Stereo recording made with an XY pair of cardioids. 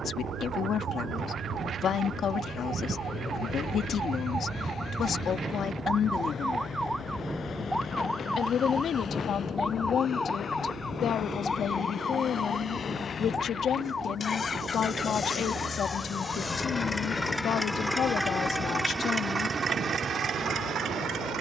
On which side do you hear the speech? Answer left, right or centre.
left.